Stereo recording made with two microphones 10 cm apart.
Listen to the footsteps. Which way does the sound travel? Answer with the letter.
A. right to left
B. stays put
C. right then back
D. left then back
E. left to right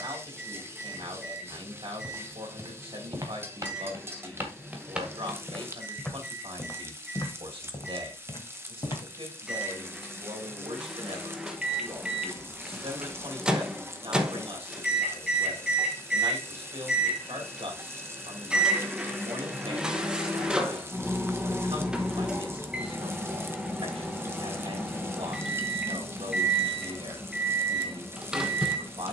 A.